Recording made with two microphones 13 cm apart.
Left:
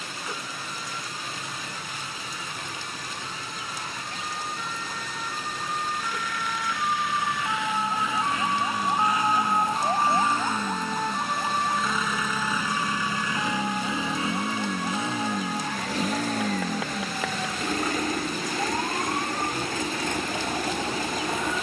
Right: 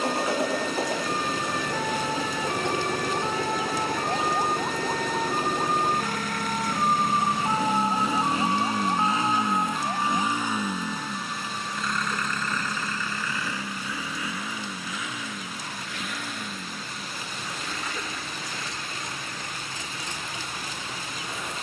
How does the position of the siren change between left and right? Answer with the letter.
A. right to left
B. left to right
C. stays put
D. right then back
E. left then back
A.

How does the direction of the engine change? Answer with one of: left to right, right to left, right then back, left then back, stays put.
right to left.